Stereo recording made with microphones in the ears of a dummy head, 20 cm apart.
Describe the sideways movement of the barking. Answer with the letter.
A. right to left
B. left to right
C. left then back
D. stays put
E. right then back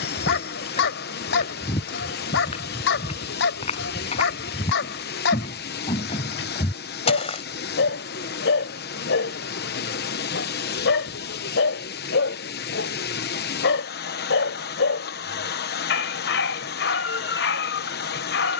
D.